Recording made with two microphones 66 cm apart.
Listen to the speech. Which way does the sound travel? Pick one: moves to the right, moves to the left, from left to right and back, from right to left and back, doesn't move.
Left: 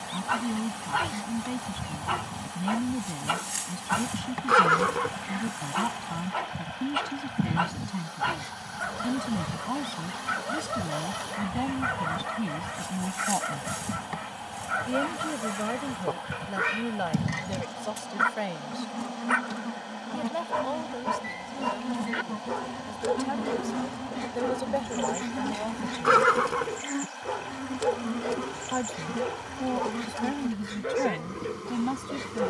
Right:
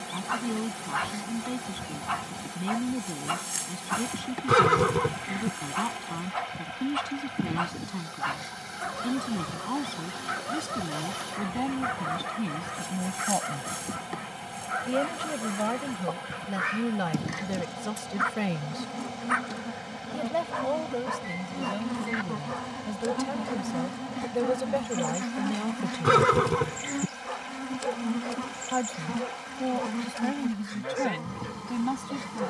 from left to right and back.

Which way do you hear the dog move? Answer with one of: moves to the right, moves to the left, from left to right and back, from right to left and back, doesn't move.
doesn't move.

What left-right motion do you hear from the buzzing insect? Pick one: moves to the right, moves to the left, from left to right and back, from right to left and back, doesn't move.
moves to the right.